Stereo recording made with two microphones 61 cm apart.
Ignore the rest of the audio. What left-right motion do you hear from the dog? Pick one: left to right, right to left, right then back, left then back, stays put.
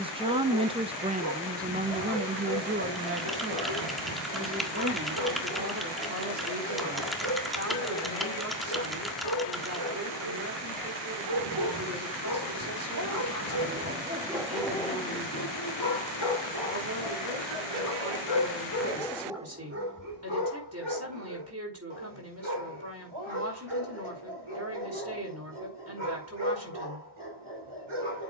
left then back.